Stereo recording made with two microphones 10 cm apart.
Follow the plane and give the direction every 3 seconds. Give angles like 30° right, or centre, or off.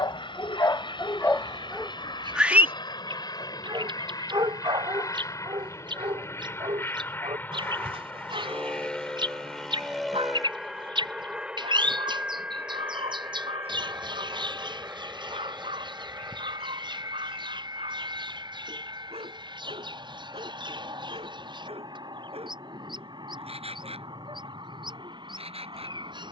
50° left, 40° left, 20° left, centre, 20° right, 30° right, 40° right, 40° right, 50° right.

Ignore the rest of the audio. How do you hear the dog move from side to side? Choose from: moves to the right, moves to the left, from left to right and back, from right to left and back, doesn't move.
moves to the right.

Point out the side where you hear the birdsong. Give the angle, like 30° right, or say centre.
50° right.